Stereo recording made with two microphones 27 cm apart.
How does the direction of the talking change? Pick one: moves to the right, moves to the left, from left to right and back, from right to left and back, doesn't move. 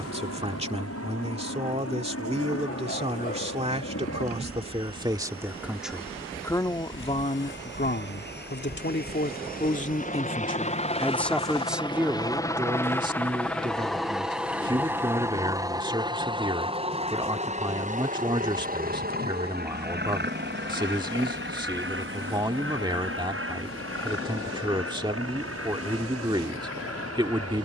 from right to left and back.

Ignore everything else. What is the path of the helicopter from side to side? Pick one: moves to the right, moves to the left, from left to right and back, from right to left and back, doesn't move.
moves to the right.